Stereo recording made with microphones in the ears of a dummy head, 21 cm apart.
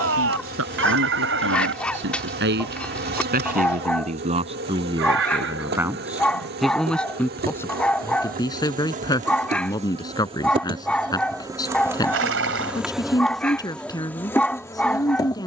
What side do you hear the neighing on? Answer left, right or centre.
right.